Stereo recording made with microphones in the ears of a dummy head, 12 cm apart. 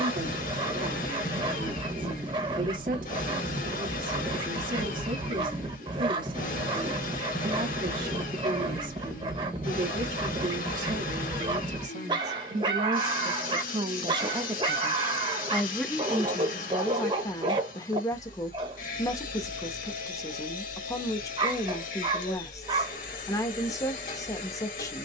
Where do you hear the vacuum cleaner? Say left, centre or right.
left.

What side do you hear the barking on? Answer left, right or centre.
right.